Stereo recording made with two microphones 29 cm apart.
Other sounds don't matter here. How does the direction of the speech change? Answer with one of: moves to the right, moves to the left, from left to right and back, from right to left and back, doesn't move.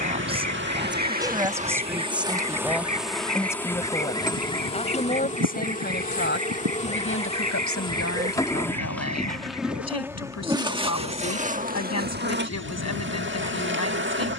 moves to the left.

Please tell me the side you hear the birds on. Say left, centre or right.
right.